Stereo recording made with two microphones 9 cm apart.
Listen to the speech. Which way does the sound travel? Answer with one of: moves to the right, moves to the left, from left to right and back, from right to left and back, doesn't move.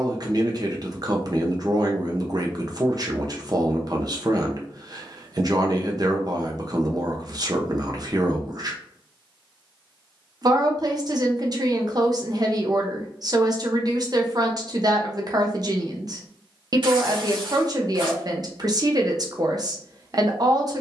doesn't move.